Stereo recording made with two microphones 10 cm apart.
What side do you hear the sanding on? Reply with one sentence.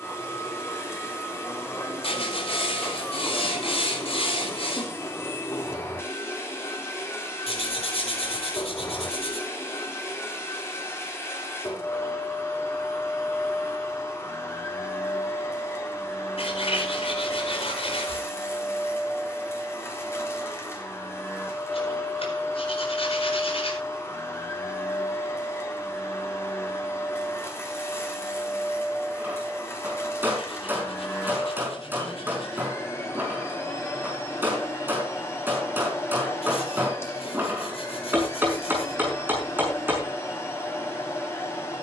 In this clip you hear the sanding on the left.